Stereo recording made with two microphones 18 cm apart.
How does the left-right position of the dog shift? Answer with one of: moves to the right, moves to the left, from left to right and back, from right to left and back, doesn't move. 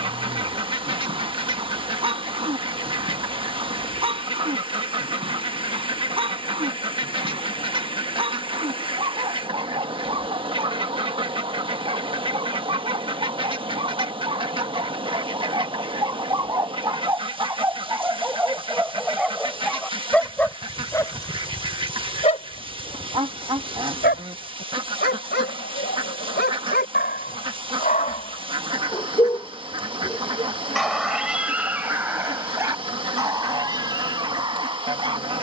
from right to left and back.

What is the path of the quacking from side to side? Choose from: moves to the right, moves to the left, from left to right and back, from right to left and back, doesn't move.
doesn't move.